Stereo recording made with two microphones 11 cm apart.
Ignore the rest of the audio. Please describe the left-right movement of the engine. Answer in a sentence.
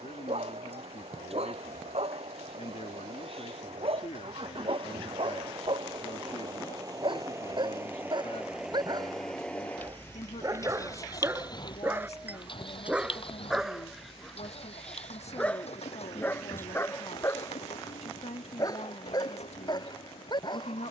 In this clip you hear the engine travel towards the left.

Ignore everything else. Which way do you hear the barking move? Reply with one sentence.
In this clip you hear the barking go from the right side to the left.